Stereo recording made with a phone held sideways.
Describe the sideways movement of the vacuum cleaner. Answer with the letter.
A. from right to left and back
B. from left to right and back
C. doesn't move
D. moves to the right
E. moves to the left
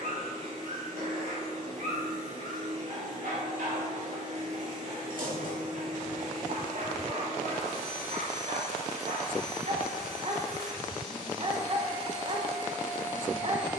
C.